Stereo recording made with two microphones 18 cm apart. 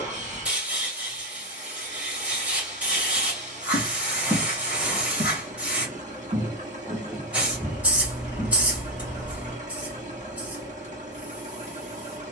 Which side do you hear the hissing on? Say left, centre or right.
centre.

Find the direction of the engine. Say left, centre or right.
right.